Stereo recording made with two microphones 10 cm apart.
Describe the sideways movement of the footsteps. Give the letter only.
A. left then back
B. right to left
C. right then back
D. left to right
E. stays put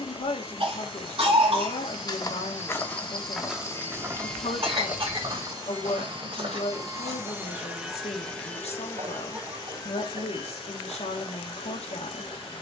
D.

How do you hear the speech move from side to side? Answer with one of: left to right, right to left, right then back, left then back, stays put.
stays put.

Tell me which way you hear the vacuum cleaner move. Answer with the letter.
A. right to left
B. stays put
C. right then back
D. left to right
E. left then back
C.